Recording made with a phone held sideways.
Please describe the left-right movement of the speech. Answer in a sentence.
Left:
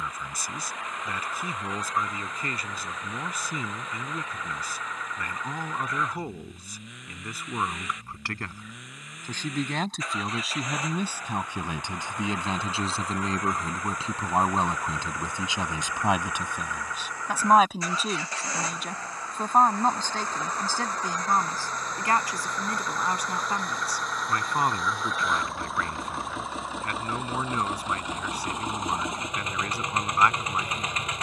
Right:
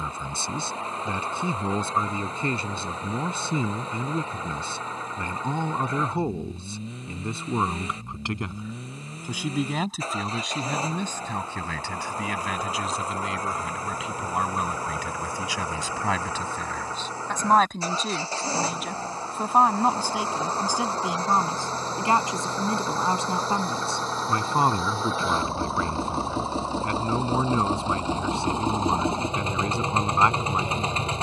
In this clip you hear the speech move from right to left and back again.